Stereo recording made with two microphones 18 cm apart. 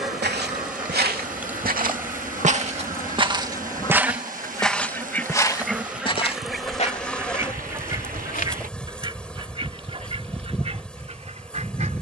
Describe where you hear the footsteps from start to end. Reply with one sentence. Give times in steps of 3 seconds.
You can hear the footsteps on the right from 0 s, in the centre from 3 s, on the left from 6 s and not at all from 9 s.